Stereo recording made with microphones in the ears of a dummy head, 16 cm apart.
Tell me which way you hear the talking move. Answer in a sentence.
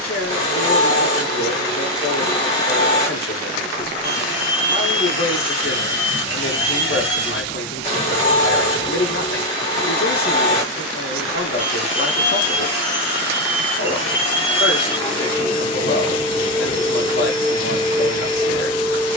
You can hear the talking stay put.